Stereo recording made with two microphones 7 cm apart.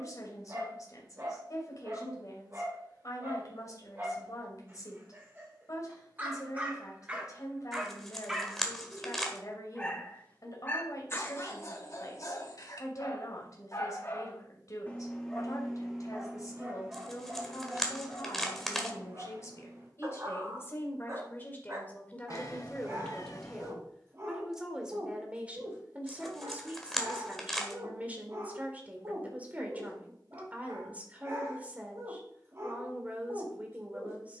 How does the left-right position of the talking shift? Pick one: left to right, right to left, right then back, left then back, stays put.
left to right.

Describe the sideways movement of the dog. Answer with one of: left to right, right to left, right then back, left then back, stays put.
left then back.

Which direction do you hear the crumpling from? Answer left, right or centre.
centre.